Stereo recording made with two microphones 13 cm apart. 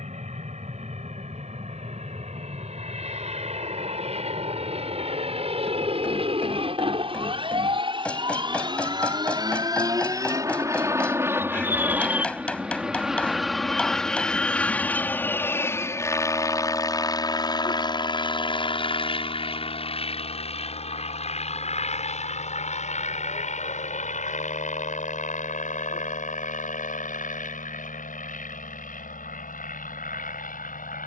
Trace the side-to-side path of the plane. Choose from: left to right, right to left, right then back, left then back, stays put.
right to left.